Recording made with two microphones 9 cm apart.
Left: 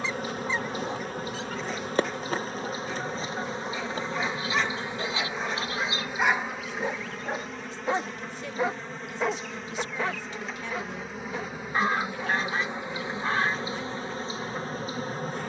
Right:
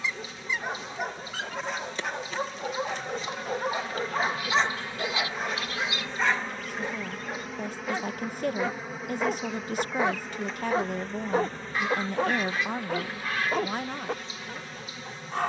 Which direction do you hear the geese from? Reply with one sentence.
You can hear the geese on the left.